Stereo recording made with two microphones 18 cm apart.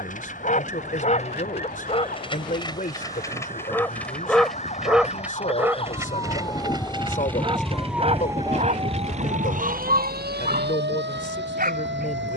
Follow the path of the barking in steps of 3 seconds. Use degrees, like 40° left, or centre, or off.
40° left, centre, 30° right, 50° right.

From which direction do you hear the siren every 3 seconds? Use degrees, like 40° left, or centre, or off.
50° left, 40° left, centre, 60° right.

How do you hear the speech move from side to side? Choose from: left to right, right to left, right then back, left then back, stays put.
stays put.